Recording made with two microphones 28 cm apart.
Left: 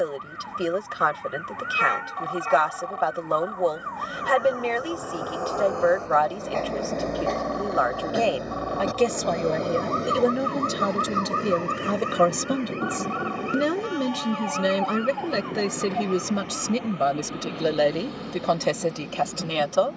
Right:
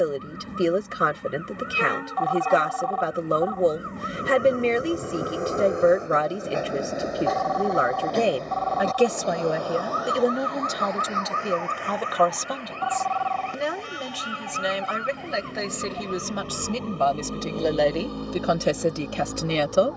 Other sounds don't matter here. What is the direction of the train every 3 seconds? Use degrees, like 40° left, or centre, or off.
50° right, 30° right, centre, 30° left, 50° left, 70° left, 70° left.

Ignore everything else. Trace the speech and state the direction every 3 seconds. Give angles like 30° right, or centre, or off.
30° right, 30° right, 20° right, 10° left, 40° left, 20° left, 20° right.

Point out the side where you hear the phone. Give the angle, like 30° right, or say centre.
30° left.